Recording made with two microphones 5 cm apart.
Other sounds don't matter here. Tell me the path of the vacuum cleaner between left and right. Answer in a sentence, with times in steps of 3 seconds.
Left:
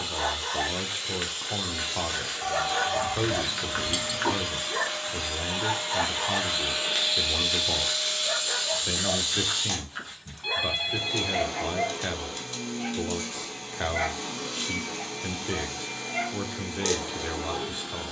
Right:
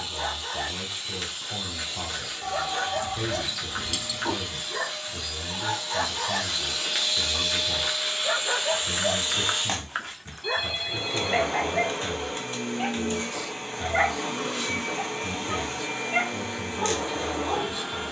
In this clip you hear the vacuum cleaner on the left from 0 s, in the centre from 6 s and on the right from 9 s.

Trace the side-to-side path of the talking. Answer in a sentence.
You can hear the talking stay put.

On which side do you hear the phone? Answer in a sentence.
You can hear the phone on the left.